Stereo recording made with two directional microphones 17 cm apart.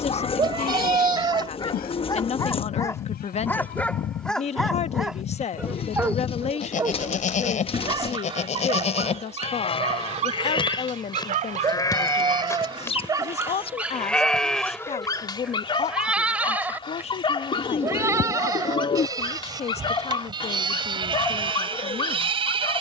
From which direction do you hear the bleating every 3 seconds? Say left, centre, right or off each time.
left, left, left, left, centre, centre, right, right.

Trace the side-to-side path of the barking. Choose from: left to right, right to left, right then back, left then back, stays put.
right then back.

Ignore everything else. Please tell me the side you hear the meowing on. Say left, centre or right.
right.